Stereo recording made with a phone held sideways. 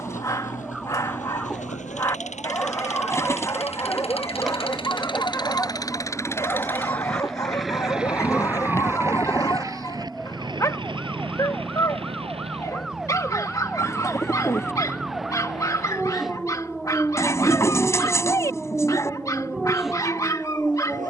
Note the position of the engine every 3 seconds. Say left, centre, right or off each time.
left, left, centre, right, right, right, right.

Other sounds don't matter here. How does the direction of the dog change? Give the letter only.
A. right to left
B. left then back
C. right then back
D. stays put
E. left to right
D.